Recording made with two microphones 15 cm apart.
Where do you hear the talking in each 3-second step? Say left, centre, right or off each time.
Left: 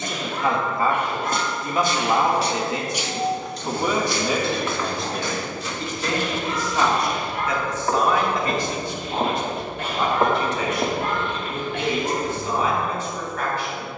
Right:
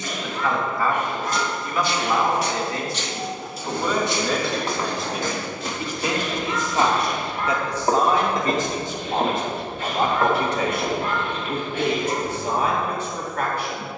left, centre, right, right, right.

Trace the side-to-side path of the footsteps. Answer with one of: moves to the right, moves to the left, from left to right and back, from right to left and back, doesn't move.
from left to right and back.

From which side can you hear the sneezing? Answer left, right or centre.
left.